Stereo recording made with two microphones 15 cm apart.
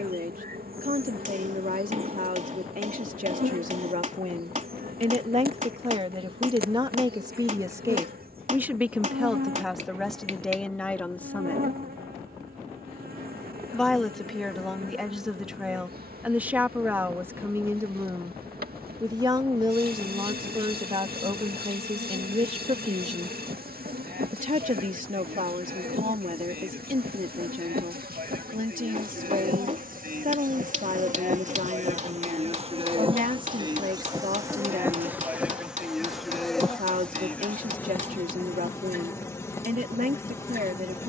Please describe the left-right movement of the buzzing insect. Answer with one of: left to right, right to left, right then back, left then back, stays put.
right to left.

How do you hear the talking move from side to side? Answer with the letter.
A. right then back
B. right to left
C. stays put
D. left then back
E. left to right
D.